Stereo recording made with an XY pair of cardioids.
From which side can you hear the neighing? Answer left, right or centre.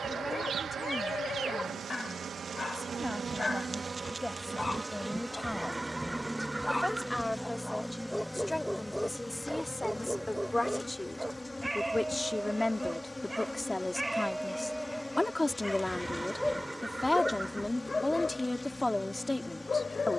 centre.